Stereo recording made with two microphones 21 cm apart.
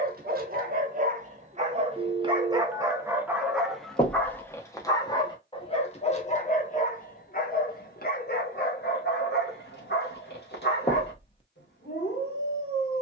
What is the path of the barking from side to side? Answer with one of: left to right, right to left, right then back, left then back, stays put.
right to left.